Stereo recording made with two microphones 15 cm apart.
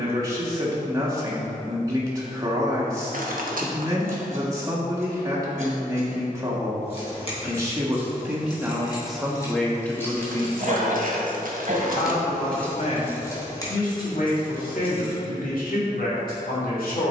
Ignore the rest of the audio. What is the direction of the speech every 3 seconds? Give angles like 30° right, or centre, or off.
20° right, 20° right, 20° right, 20° left, 60° left, 70° left.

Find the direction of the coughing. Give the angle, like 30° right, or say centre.
60° right.